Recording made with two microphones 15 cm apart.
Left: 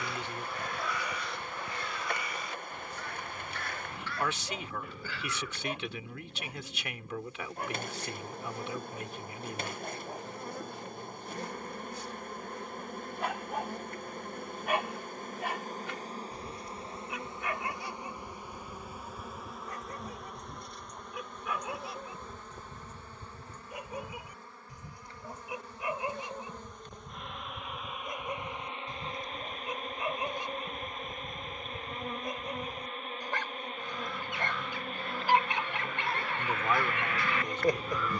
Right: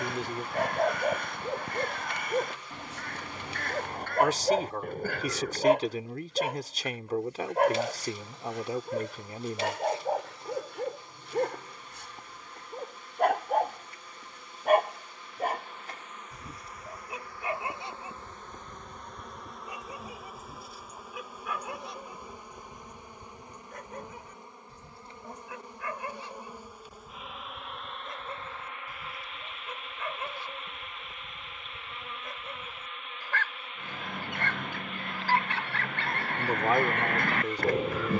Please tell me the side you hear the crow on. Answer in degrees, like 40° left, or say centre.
50° right.